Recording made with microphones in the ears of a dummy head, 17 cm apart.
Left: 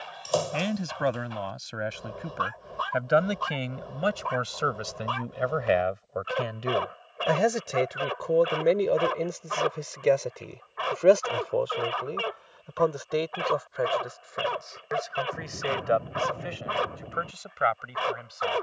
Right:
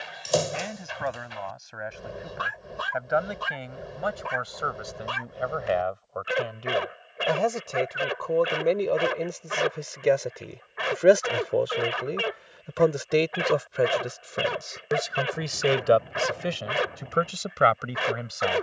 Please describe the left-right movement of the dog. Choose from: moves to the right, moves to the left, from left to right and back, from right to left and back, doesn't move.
doesn't move.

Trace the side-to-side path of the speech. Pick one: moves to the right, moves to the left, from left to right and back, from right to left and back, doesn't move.
moves to the right.